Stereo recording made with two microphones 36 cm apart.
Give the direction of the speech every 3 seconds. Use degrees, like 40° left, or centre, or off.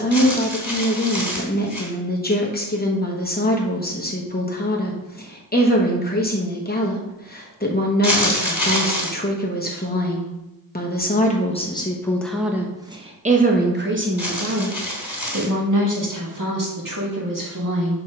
30° left, 30° left, 30° left, 20° left, 20° right, 60° right.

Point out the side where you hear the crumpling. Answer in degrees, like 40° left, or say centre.
50° left.